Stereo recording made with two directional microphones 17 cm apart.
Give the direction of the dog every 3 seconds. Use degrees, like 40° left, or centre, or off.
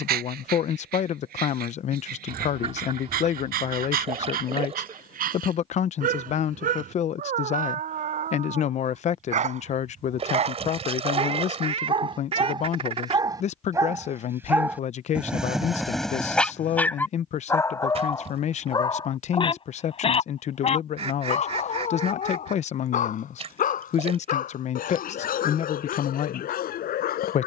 60° right, 60° right, 50° right, 40° right, 20° right, 10° left, 30° left, 50° left, 60° left.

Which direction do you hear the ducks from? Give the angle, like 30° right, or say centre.
40° right.